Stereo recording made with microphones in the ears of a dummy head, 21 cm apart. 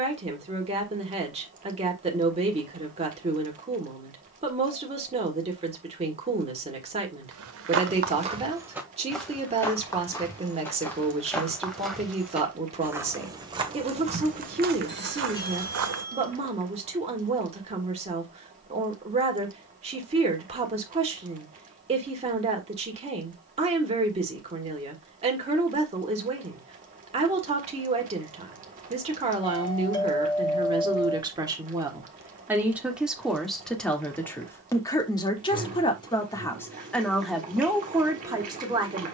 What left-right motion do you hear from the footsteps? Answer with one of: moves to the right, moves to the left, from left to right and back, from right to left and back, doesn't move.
from right to left and back.